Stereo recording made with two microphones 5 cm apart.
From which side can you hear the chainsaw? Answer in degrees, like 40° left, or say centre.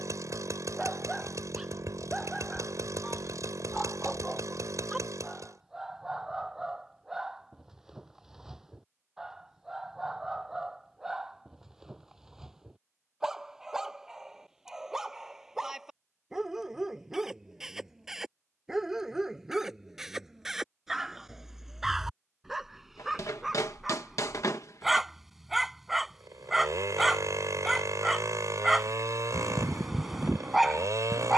80° right.